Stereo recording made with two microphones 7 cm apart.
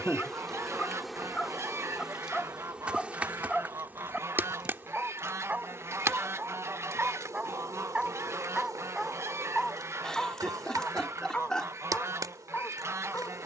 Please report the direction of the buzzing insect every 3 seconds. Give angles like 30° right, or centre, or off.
centre, 30° right, 50° right, 60° right, 60° right.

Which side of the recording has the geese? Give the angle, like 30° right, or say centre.
40° right.